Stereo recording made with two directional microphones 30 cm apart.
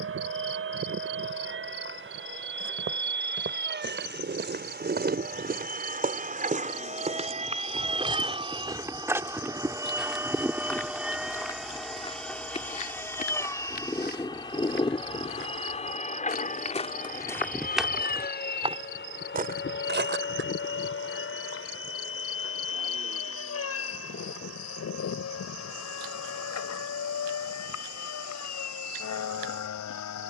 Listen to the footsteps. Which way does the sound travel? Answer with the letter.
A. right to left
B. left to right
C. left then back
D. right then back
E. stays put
C.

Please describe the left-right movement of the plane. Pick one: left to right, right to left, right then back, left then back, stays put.
right to left.